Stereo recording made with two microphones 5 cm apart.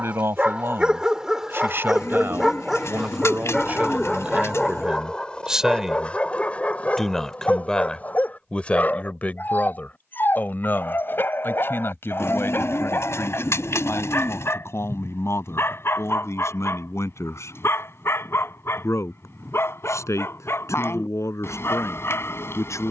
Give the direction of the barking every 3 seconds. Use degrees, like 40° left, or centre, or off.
10° right, 10° left, 30° left, 40° left, 50° left, 50° left, 50° left, 50° left.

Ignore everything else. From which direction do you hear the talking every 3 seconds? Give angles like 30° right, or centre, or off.
50° right, 20° right, 10° left, 40° left, 60° left, 60° left, 70° left, 70° left.